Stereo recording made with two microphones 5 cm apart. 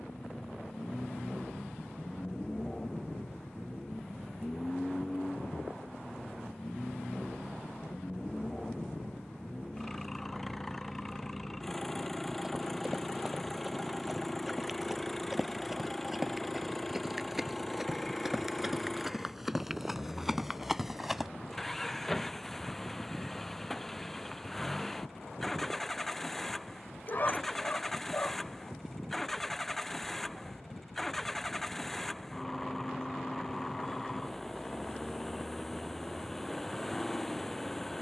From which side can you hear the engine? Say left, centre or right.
centre.